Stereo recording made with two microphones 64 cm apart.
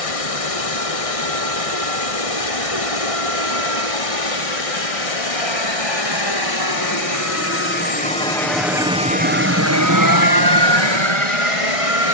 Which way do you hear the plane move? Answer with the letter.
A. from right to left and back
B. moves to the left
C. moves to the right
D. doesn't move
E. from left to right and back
C.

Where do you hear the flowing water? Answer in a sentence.
You can hear the flowing water on the left.